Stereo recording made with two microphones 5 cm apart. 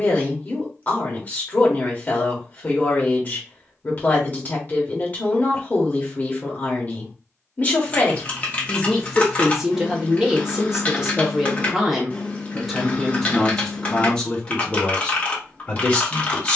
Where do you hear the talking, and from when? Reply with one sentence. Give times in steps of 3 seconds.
You can hear the talking on the left from 0 s, in the centre from 9 s and on the left from 15 s.